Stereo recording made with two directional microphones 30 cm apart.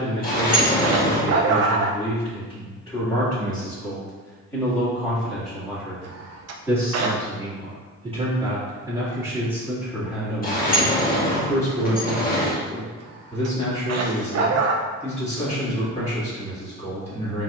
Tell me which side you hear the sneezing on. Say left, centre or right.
right.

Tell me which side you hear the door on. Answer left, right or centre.
left.